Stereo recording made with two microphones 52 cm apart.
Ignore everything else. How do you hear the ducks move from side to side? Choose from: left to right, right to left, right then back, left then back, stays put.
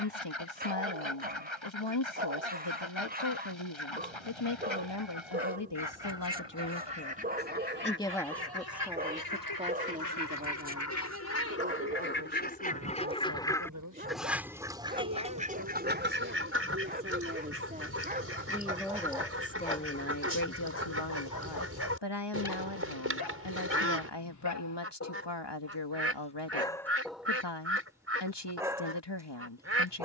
left to right.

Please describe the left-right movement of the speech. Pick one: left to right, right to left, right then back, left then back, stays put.
right then back.